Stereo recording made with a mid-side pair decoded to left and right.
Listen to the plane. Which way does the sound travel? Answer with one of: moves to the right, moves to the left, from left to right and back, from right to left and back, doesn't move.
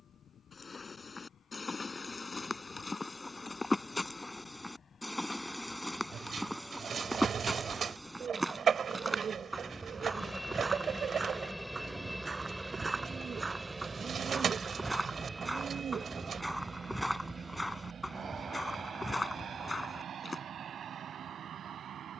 moves to the right.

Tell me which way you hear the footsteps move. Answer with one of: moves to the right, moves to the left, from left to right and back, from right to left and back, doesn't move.
from left to right and back.